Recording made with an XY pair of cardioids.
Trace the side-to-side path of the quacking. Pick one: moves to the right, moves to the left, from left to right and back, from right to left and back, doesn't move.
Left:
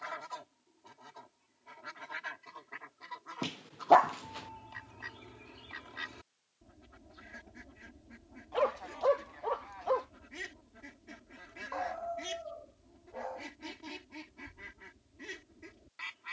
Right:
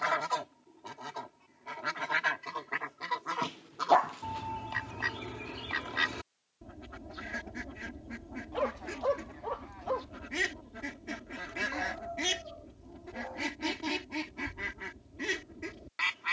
doesn't move.